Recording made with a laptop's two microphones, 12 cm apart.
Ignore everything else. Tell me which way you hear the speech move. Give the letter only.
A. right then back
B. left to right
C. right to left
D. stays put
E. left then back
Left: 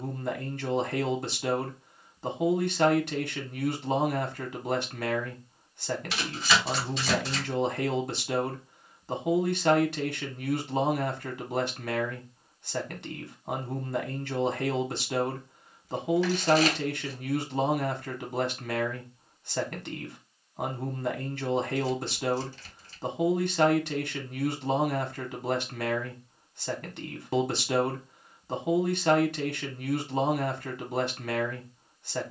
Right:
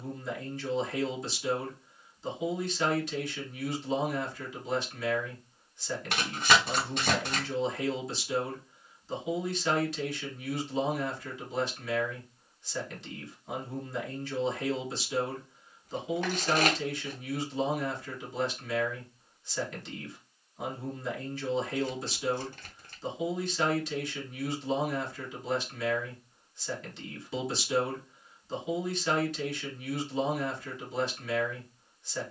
D.